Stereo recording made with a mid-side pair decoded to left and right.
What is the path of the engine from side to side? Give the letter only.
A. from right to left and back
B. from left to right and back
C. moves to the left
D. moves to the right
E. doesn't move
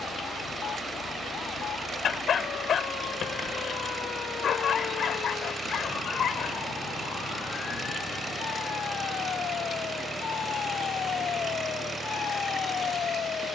E.